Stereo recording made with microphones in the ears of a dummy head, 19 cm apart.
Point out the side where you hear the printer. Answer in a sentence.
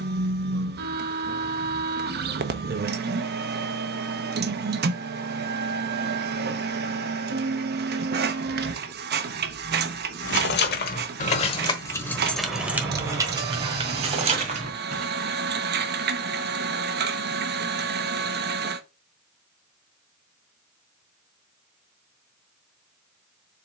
You can hear the printer on the right.